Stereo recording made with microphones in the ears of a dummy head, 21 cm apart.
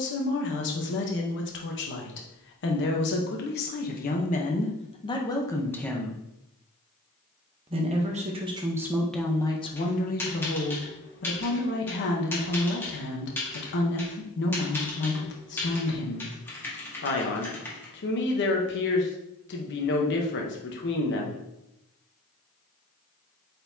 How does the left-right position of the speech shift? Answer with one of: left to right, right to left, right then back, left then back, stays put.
right then back.